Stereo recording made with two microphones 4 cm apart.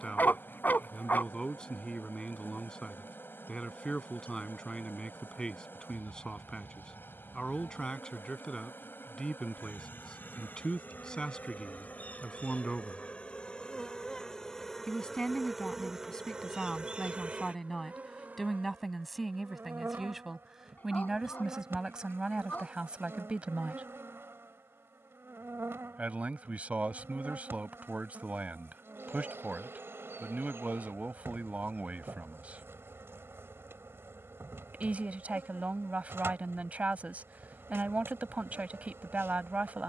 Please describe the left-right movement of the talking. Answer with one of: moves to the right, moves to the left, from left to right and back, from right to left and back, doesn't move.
moves to the right.